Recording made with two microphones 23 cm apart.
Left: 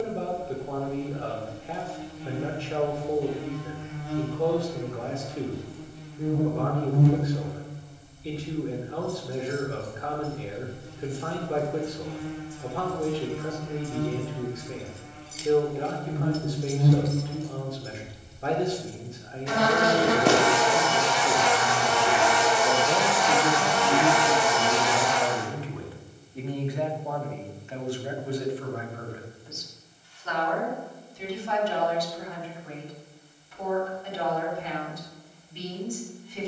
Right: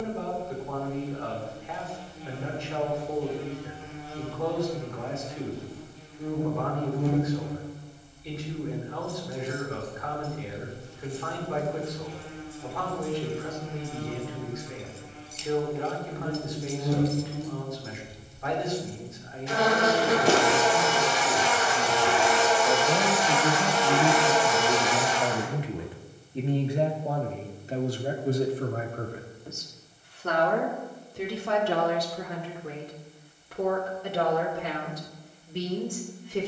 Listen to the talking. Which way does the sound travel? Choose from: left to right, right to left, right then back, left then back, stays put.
left to right.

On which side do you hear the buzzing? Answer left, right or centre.
left.